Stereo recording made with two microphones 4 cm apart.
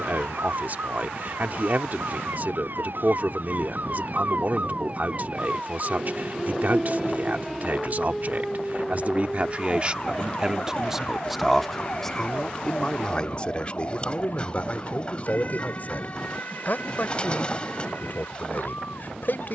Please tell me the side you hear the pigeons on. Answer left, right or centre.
left.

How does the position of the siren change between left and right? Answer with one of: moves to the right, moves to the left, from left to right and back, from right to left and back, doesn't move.
moves to the left.